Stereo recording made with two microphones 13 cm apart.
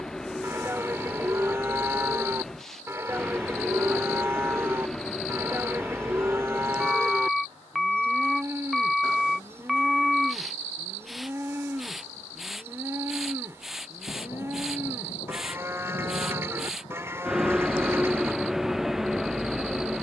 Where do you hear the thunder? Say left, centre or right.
left.